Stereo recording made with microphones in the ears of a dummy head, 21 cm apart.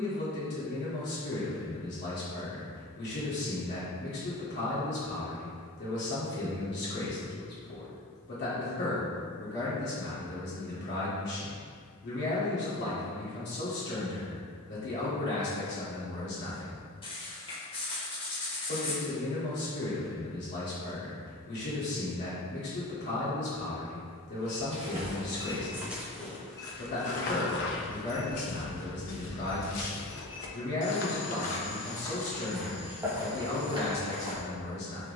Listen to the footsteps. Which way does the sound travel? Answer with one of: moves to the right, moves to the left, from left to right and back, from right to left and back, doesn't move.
from right to left and back.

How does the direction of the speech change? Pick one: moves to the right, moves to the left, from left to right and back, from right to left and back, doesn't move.
doesn't move.